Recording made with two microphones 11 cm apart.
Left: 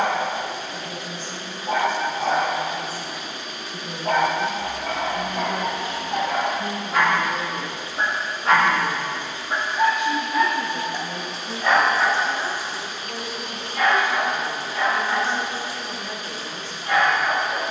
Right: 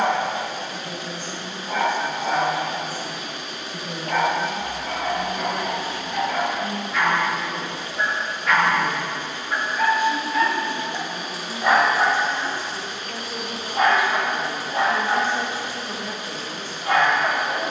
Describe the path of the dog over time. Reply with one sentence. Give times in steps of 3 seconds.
In this clip you hear the dog on the left from 0 s, in the centre from 9 s and on the right from 12 s.